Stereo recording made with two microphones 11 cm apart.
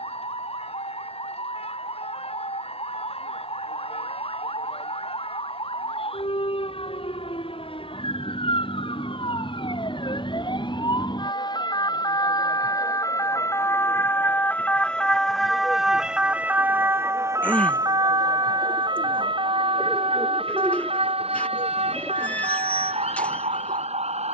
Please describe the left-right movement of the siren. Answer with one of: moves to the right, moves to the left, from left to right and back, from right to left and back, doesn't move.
moves to the right.